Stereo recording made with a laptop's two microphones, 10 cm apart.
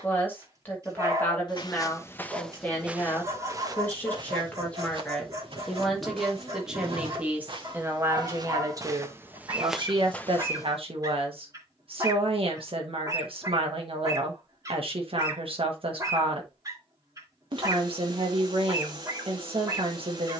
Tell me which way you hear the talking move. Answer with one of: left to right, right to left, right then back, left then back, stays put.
left to right.